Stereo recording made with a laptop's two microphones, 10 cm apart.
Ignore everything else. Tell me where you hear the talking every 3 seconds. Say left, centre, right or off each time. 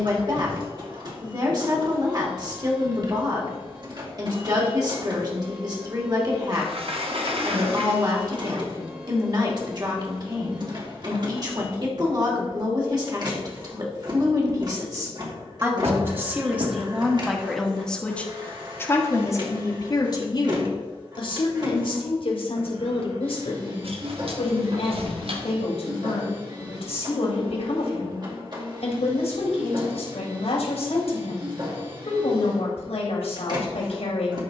right, right, right, right, right, centre, left, left, left, left, left, left.